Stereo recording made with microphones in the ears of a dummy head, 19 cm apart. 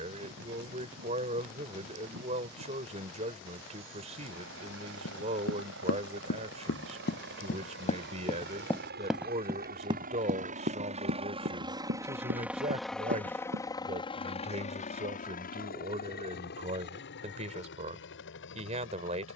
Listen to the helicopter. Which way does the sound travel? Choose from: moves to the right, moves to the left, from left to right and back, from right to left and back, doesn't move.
moves to the left.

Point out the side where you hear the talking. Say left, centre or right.
right.